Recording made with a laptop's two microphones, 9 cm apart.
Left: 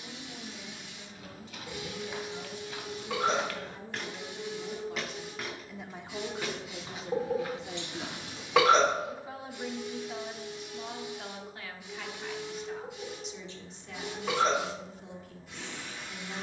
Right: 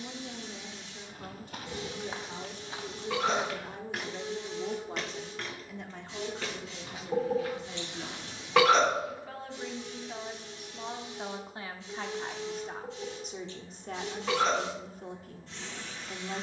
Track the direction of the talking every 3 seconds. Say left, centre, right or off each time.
right, right, left, centre, right, right.